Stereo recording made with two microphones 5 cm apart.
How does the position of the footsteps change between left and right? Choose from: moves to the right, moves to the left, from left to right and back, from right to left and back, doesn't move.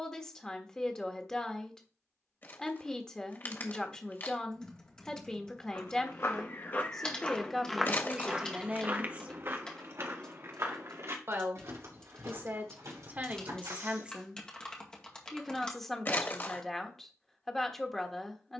moves to the right.